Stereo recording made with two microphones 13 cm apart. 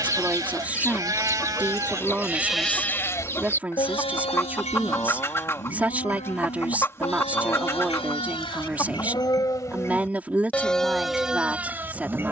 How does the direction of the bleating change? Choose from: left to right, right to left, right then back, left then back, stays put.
left then back.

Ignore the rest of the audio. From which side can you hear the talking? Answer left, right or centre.
centre.